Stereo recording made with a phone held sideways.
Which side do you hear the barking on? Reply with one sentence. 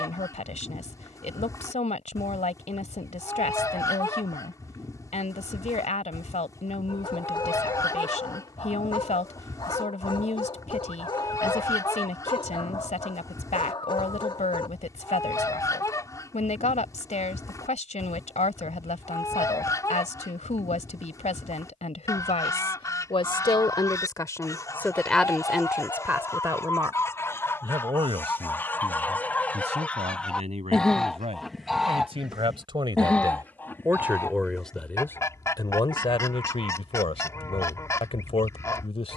In this clip you hear the barking on the left.